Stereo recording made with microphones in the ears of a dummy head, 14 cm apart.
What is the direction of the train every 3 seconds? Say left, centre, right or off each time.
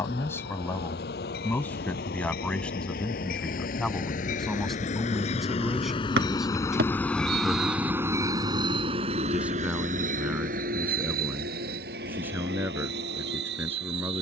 left, left, centre, right, right.